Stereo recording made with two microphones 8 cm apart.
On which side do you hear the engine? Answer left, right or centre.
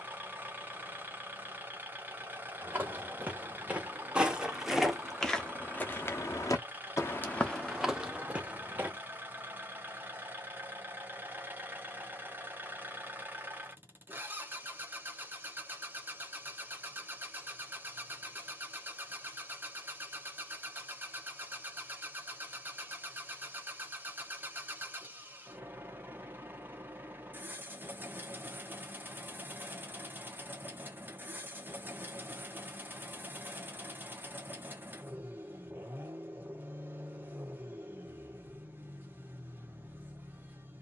right.